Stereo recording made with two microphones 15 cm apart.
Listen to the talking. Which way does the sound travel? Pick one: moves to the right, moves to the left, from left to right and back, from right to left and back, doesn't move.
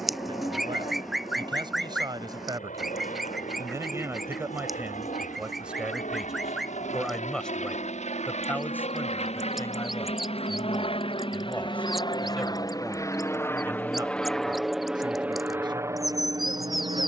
from right to left and back.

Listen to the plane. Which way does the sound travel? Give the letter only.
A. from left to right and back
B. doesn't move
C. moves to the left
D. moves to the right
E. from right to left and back
D.